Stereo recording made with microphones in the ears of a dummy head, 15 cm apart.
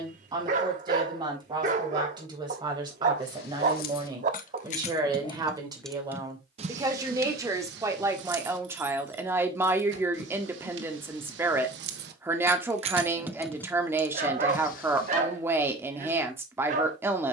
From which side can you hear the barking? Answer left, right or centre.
right.